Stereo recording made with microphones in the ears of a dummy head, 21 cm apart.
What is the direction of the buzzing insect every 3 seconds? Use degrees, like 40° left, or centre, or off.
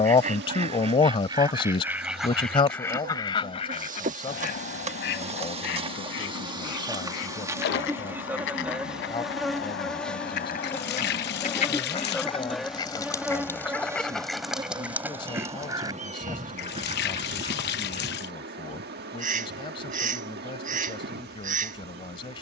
50° right, 30° right, 10° right, 10° left, 10° right, 30° right, 40° right, 40° right.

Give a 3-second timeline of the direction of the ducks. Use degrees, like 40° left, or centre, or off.
10° right, 40° left, 60° left, 40° left, 10° left, 20° right, 40° right, 40° right.